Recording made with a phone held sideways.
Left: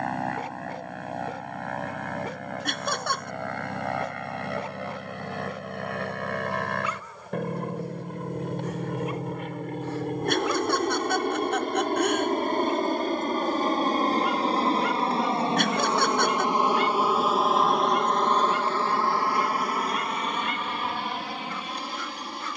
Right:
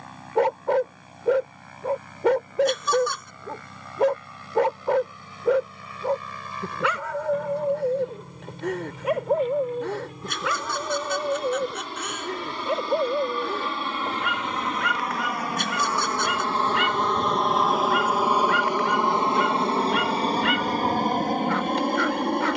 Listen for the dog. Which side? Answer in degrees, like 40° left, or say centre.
70° right.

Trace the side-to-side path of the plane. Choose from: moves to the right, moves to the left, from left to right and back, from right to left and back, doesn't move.
moves to the right.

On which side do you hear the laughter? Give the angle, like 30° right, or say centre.
60° left.